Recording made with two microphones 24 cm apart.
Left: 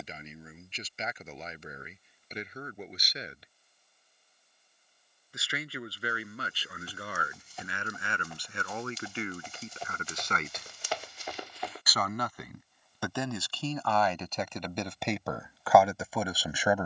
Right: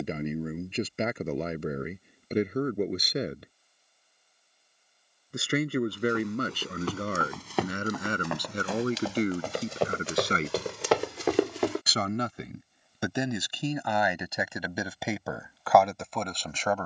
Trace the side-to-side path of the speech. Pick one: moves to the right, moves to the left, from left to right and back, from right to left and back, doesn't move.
moves to the left.